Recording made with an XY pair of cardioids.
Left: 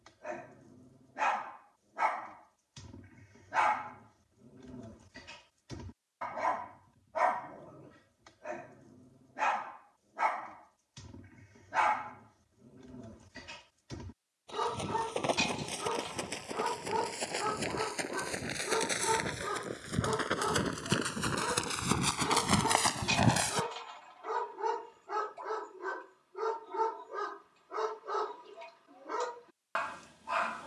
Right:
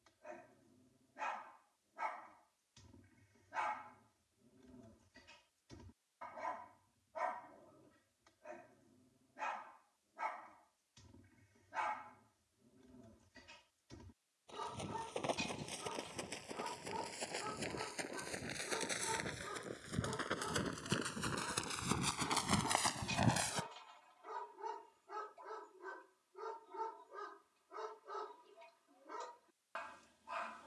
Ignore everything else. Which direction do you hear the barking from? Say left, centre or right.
left.